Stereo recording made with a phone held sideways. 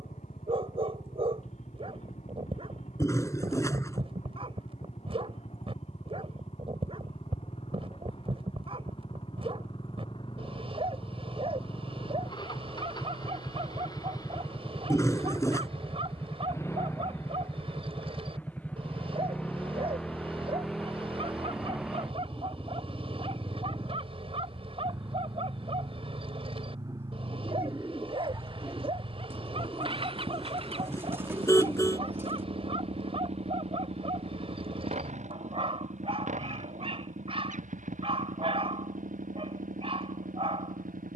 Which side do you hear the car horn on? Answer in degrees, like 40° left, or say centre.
20° left.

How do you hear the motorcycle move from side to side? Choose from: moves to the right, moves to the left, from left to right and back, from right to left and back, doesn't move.
moves to the right.